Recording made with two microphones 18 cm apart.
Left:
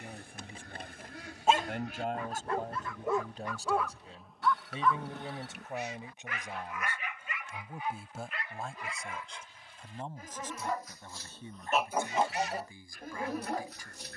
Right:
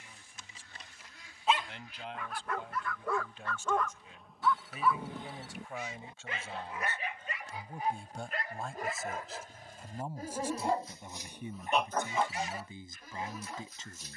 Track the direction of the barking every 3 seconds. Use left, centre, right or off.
left, centre, right, right, left.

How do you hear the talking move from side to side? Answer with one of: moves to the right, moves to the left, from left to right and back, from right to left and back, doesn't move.
moves to the right.